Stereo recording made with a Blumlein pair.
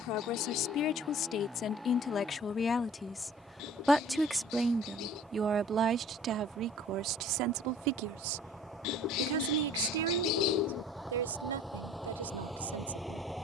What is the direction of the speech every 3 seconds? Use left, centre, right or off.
left, centre, right, right, right.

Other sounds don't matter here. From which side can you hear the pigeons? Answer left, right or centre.
left.